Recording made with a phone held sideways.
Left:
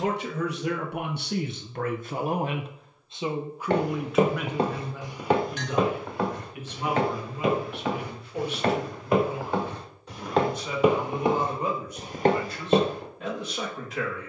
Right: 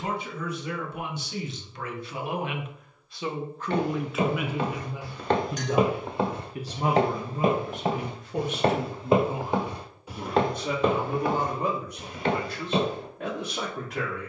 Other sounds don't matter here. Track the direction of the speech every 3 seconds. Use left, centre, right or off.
left, centre, right, right, right.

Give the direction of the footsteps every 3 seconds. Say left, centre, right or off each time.
off, left, right, centre, left.